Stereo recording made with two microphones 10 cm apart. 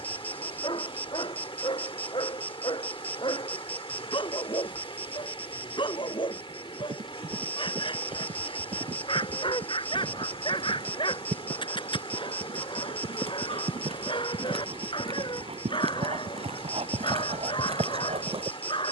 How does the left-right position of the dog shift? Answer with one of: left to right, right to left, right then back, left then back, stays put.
stays put.